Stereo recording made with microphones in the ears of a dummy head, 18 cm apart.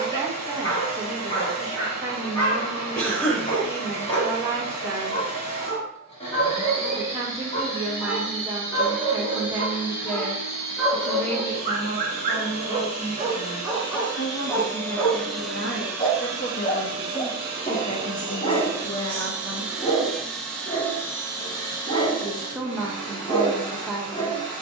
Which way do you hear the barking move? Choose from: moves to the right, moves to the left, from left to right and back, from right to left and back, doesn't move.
from left to right and back.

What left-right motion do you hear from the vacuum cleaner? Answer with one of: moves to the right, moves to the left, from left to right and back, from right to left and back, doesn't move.
from left to right and back.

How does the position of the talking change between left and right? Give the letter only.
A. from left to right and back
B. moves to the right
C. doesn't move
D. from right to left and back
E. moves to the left
D.